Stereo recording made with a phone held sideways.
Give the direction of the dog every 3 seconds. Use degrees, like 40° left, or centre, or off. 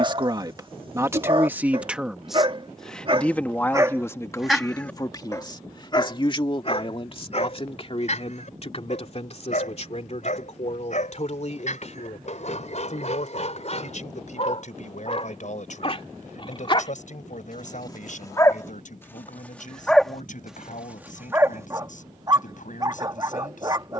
40° right, centre, 50° left, 60° left, 50° left, 40° left, 10° left, 20° right.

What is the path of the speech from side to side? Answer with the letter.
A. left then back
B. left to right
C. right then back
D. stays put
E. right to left
E.